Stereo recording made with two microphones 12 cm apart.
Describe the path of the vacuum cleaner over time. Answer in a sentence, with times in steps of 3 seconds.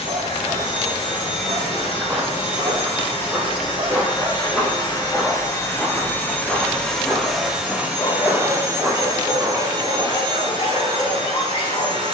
In this clip you hear the vacuum cleaner on the left from 0 s, in the centre from 6 s and on the right from 9 s.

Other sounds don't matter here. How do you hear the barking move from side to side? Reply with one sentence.
You can hear the barking go from the right side to the left.